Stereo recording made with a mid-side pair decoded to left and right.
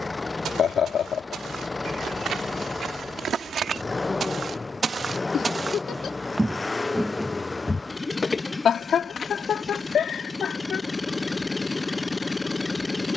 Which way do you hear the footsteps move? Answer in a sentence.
In this clip you hear the footsteps go from the right side to the left.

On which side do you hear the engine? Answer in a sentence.
In this clip you hear the engine on the left.